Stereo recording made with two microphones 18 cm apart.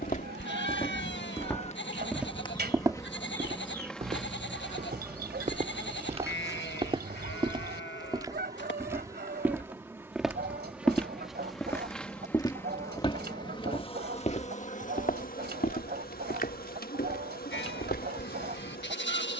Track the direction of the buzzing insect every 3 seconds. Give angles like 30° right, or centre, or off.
40° left, centre, 20° right, 10° right, 30° left, 50° left, 50° left.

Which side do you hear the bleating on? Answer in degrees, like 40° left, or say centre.
80° left.